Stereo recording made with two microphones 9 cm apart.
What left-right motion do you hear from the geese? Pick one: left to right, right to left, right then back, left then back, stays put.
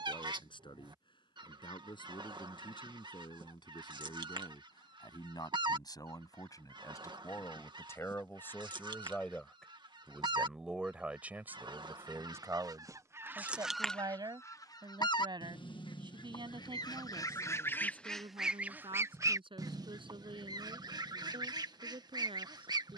left then back.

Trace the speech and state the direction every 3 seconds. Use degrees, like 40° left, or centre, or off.
60° left, 50° left, 30° left, 10° right, 40° right, 60° right, 70° right, 80° right.